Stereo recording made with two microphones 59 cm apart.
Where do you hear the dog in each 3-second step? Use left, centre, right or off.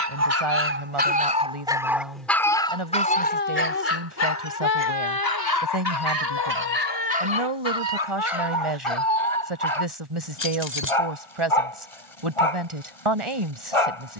centre, left, left, left, left.